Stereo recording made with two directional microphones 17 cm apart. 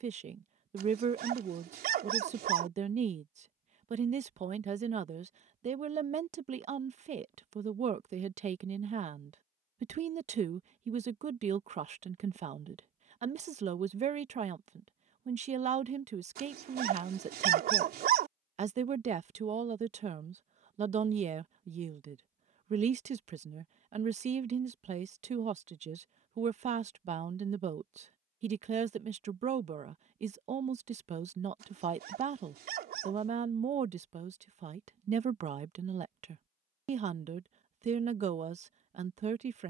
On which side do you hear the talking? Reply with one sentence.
In this clip you hear the talking on the right.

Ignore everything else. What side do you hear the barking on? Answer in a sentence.
In this clip you hear the barking on the right.